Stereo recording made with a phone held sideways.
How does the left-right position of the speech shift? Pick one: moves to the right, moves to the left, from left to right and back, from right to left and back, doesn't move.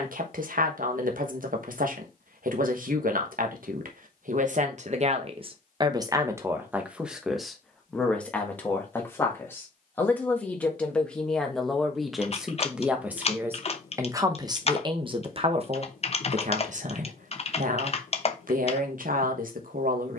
from right to left and back.